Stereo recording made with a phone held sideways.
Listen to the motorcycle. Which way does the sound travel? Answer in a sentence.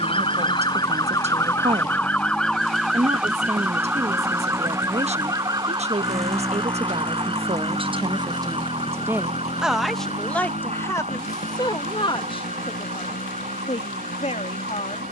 In this clip you hear the motorcycle go from the right side to the left.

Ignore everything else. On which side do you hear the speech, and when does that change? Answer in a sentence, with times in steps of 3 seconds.
In this clip you hear the speech on the right from 0 s, in the centre from 9 s and on the left from 12 s.